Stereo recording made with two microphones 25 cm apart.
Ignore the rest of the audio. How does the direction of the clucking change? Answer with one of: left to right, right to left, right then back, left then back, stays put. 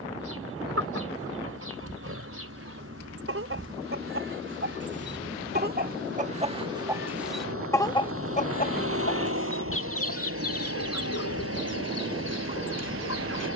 right to left.